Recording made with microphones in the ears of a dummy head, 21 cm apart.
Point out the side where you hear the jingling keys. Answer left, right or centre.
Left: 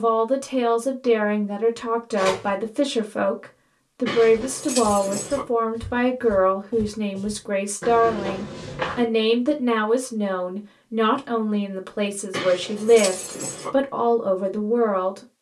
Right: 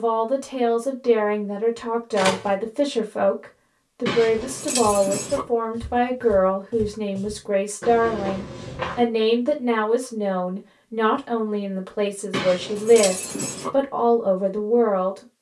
right.